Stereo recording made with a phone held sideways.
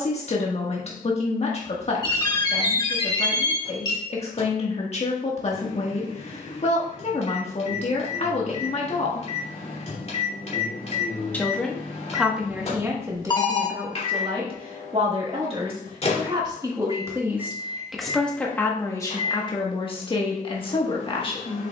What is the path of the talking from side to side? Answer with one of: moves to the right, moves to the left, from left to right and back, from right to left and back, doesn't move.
from left to right and back.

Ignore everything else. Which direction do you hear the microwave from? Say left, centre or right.
left.